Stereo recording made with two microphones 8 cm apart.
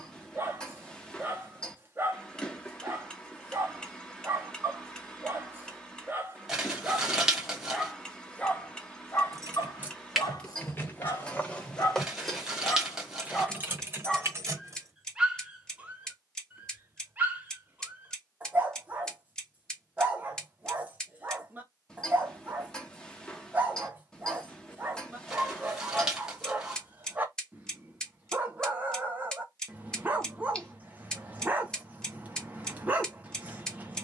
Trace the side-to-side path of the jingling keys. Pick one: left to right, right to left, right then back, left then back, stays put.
left then back.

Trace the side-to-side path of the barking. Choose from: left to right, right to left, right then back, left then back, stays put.
left then back.